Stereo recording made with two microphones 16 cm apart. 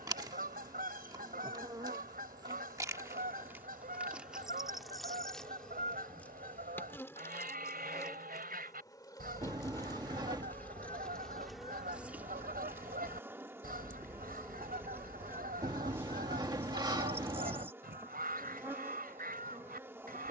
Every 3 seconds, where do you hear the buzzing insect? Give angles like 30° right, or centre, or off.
20° right, centre, 20° left, 10° left, 10° right, 20° right, 20° right.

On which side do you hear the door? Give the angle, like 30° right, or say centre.
30° right.